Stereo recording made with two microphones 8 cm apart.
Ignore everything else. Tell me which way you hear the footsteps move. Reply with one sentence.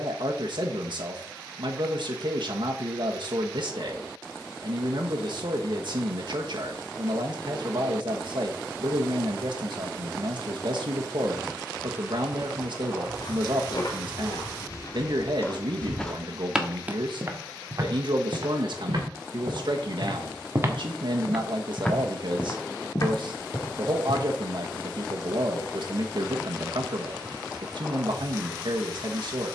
In this clip you hear the footsteps go right and come back.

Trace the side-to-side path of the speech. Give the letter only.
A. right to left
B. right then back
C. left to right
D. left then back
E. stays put
E.